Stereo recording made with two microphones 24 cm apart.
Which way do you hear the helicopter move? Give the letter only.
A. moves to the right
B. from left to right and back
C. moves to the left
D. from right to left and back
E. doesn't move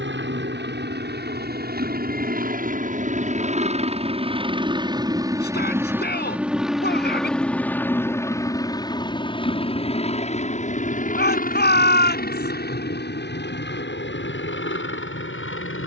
C.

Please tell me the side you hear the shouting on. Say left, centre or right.
left.